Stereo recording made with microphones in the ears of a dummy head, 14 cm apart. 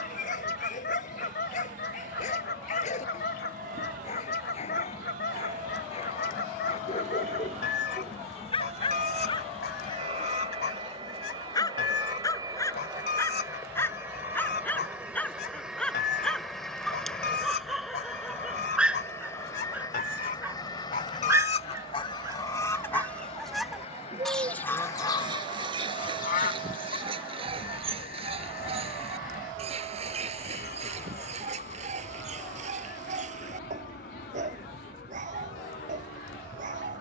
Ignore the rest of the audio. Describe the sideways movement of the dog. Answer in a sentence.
You can hear the dog move to the right.